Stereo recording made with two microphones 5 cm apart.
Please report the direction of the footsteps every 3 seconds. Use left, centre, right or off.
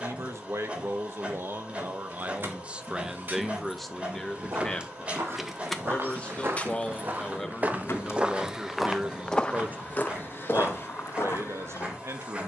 off, right, right, left.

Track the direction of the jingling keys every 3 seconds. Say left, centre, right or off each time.
right, right, left, off.